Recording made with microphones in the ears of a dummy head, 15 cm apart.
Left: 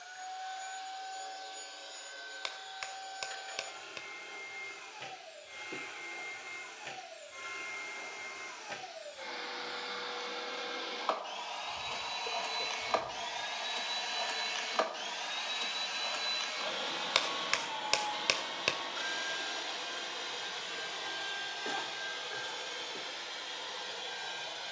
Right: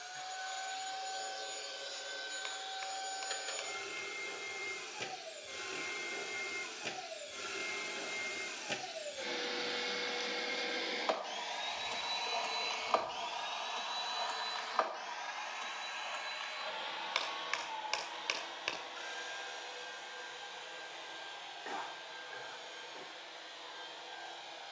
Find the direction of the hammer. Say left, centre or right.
left.